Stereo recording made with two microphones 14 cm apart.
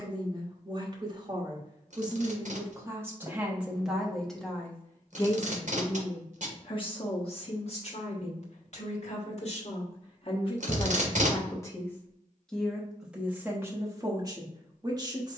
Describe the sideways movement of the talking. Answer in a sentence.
You can hear the talking go left and come back.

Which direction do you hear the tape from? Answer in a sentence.
In this clip you hear the tape on the right.